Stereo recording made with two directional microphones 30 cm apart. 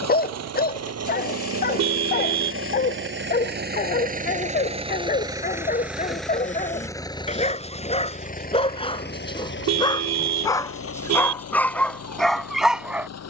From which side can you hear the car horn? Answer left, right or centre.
right.